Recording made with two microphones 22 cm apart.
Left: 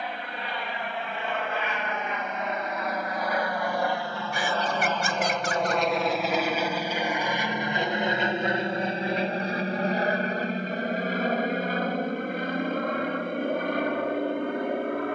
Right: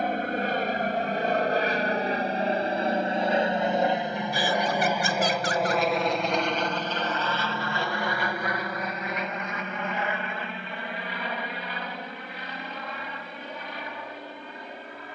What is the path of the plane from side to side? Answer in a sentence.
In this clip you hear the plane travel towards the left.